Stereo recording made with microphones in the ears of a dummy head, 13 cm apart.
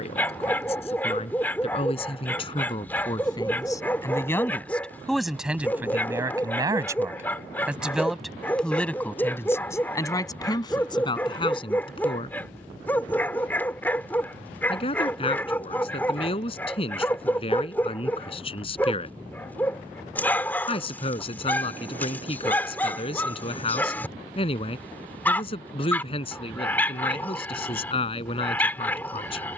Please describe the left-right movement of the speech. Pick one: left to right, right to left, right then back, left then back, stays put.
right then back.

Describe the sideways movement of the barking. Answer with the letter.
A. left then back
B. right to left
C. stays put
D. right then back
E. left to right
C.